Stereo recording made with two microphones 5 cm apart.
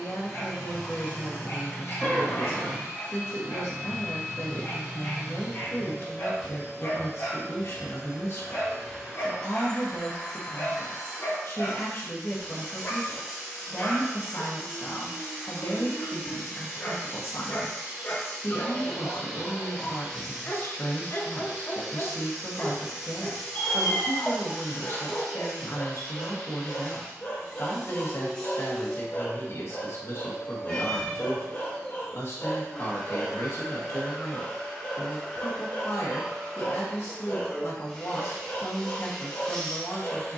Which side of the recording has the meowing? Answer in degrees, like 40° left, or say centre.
20° left.